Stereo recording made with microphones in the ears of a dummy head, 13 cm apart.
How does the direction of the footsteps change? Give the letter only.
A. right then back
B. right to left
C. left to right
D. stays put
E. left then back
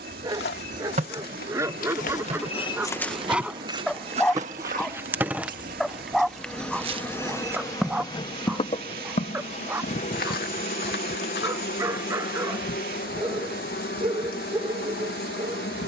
A.